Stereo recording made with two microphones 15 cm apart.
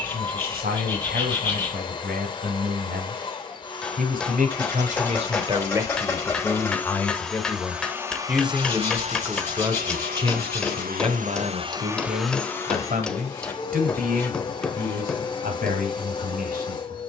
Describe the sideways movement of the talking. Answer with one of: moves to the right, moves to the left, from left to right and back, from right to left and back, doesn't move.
from right to left and back.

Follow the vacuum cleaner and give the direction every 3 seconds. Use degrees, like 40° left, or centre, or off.
30° left, 30° left, 10° right, 60° right, 20° left, 30° left.